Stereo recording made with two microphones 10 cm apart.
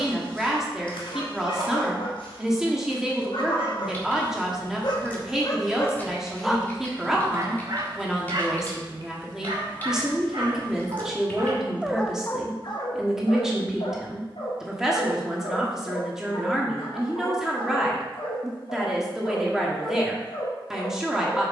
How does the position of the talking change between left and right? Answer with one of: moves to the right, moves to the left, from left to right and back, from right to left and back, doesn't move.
doesn't move.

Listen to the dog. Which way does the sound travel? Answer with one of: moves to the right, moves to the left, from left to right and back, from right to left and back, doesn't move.
from left to right and back.